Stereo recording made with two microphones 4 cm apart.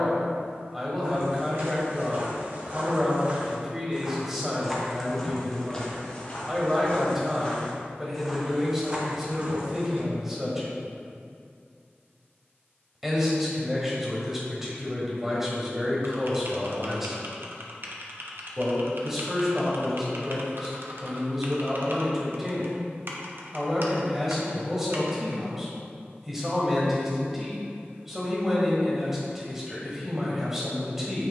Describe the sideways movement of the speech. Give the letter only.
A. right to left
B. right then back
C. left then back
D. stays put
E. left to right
D.